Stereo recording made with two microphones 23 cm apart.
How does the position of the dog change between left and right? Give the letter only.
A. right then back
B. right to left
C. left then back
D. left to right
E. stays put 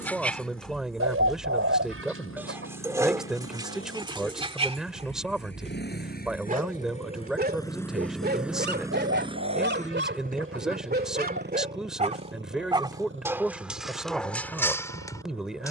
A.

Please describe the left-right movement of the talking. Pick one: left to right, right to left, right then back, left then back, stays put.
stays put.